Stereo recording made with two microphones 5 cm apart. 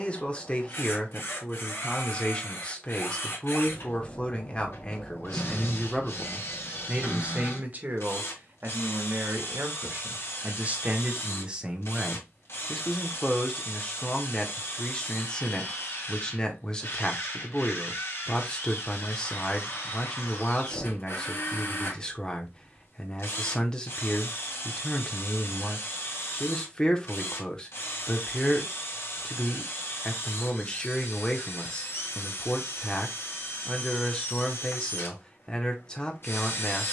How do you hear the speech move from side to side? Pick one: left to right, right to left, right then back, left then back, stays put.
right then back.